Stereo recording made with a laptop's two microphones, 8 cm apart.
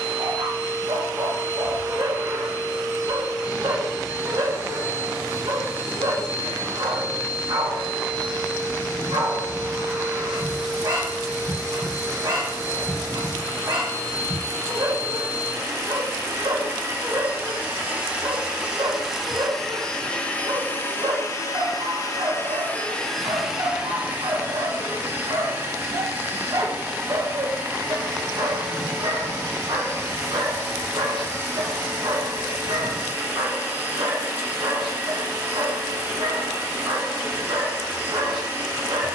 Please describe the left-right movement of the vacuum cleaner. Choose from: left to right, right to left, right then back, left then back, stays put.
left then back.